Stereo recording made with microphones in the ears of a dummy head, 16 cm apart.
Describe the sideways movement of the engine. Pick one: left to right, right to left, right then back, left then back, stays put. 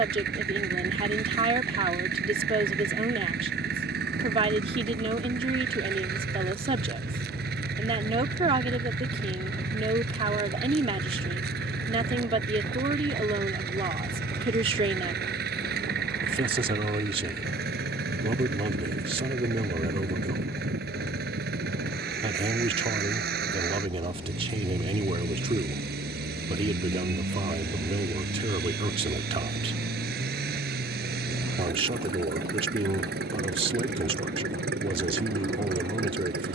stays put.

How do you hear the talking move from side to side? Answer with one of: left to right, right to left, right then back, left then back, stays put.
stays put.